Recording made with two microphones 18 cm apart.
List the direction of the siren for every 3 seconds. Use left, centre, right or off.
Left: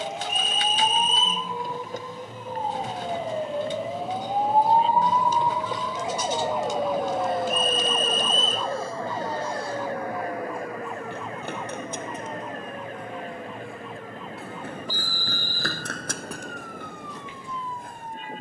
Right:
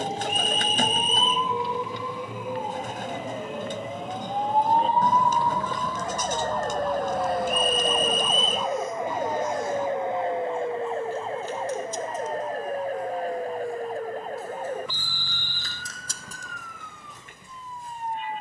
left, left, centre, right, right, right.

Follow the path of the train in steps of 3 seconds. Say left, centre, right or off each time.
right, centre, left, left, left, left.